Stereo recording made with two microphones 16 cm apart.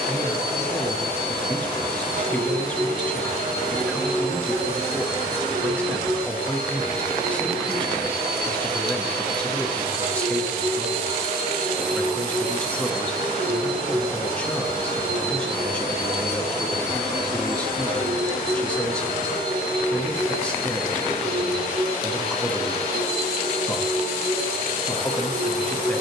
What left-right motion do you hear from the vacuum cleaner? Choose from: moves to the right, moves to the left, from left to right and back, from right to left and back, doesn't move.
doesn't move.